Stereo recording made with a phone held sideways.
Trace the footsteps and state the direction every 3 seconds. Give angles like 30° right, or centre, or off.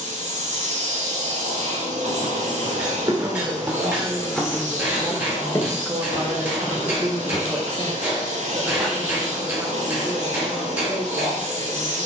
40° right, centre, 40° left, off.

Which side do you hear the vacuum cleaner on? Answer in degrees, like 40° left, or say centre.
60° right.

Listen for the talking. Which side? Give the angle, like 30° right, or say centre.
20° right.